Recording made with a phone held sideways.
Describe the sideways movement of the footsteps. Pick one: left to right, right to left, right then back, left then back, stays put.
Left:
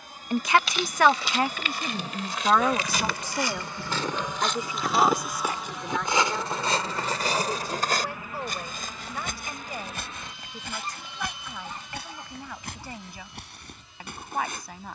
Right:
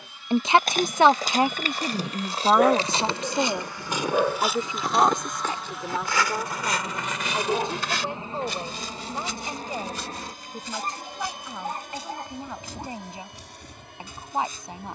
right to left.